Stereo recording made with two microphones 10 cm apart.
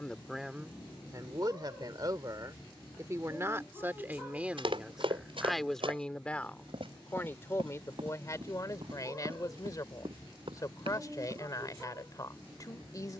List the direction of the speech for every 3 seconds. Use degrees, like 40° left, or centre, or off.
30° right, 10° right, 30° left, 40° left, 40° left.